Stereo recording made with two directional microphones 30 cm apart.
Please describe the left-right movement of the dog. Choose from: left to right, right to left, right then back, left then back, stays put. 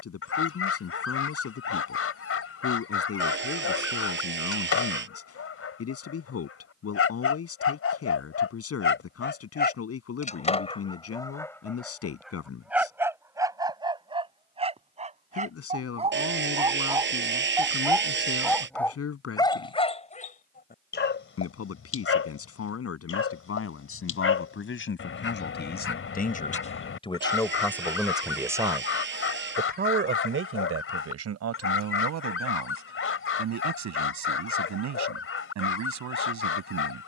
right then back.